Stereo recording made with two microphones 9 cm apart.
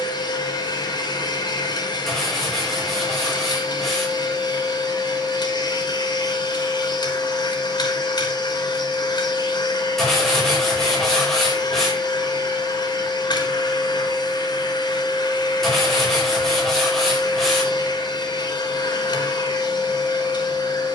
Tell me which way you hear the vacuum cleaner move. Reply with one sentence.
You can hear the vacuum cleaner stay in one place.